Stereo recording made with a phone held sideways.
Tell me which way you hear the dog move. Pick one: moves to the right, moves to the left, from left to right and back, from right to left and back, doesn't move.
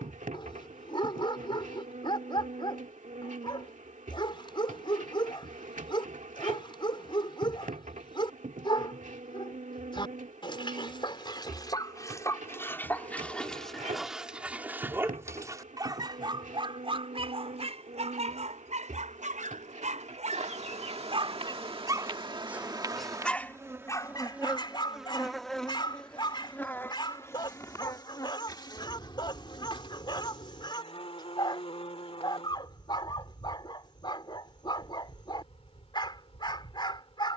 from left to right and back.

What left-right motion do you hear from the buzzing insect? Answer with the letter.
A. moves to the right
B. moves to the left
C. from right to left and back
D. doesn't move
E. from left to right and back
B.